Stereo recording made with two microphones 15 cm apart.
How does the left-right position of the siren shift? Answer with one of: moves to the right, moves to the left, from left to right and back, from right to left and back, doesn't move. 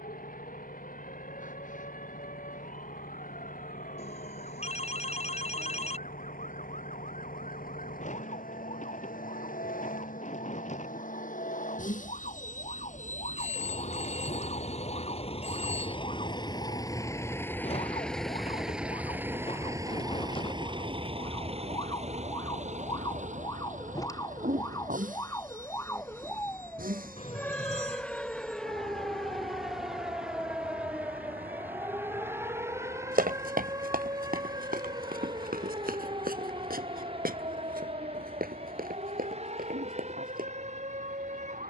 moves to the right.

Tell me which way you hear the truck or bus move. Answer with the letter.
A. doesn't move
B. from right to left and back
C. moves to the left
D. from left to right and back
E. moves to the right
E.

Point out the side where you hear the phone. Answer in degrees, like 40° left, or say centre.
50° left.